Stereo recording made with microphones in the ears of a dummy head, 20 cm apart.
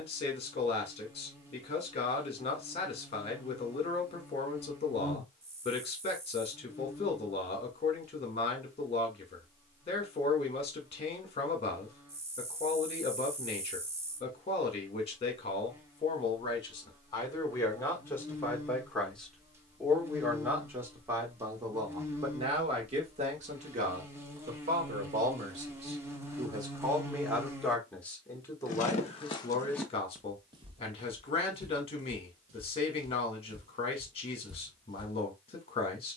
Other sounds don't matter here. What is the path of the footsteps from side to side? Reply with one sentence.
In this clip you hear the footsteps go right and come back.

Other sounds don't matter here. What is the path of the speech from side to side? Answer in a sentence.
You can hear the speech go right and come back.